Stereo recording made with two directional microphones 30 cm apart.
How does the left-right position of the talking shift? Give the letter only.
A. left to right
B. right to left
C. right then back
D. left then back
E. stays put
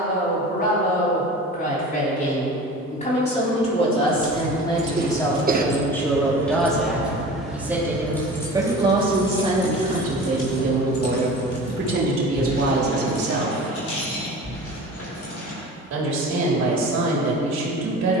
A.